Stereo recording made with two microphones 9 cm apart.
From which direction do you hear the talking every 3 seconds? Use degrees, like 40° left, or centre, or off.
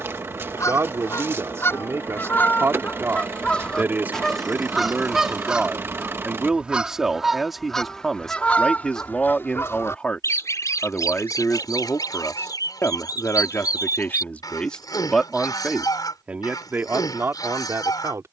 30° right, 20° right, centre, 20° left, 20° left, 20° right.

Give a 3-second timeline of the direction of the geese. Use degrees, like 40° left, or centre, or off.
30° left, centre, centre, 40° left, 50° left, 50° left.